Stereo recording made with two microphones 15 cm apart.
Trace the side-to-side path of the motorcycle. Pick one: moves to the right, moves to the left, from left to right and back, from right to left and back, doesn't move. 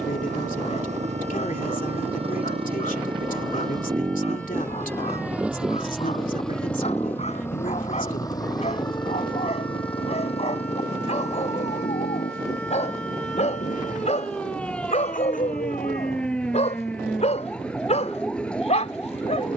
moves to the left.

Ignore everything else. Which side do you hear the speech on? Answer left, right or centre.
left.